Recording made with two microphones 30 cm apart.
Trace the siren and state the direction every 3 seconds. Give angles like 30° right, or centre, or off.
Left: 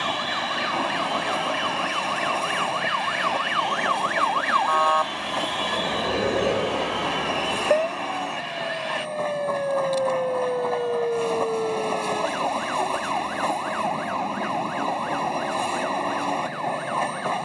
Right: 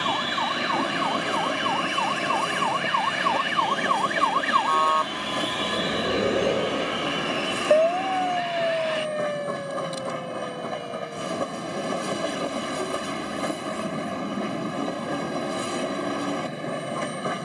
70° right, 40° right, 30° left, 70° left, 80° left, 80° left.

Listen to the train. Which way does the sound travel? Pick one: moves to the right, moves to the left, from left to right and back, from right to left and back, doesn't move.
doesn't move.